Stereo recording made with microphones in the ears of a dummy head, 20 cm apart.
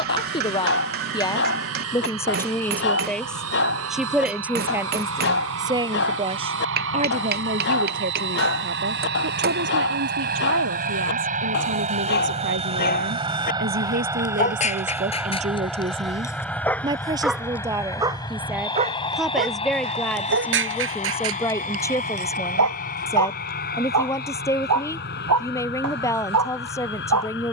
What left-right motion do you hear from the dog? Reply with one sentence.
You can hear the dog travel towards the right.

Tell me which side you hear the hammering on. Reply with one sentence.
You can hear the hammering on the right.